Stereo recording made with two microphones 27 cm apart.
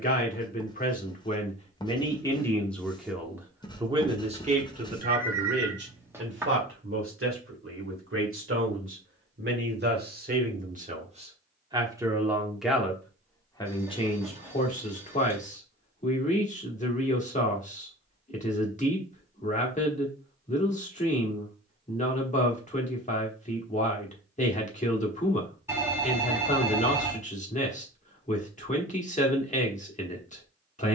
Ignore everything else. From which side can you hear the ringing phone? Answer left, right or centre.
centre.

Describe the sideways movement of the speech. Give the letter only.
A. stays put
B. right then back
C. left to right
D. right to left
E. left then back
B.